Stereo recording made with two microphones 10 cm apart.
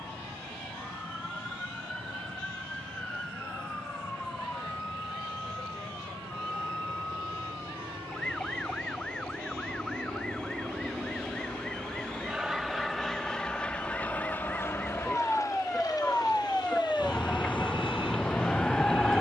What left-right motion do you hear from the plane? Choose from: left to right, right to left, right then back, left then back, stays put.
right to left.